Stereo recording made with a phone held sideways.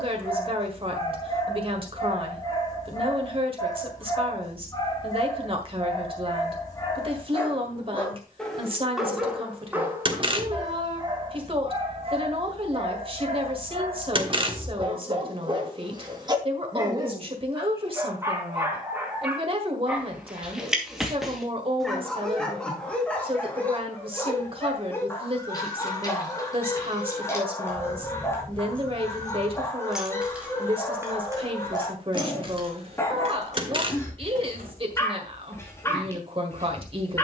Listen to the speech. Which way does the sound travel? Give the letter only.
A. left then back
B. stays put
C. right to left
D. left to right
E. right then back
B.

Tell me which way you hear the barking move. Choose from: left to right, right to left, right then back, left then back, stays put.
right then back.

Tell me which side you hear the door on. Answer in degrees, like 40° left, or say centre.
40° right.